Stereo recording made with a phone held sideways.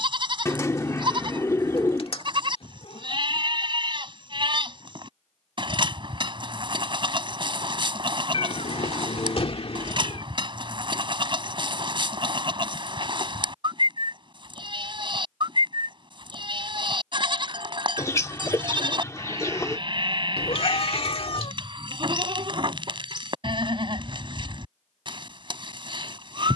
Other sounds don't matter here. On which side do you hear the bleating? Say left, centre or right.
right.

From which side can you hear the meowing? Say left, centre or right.
left.